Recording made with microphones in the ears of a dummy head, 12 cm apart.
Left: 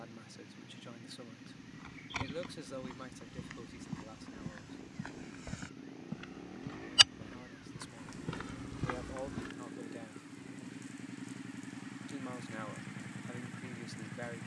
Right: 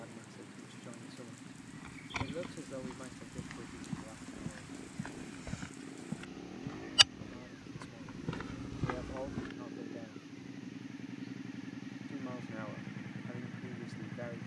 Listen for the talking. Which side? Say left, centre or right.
left.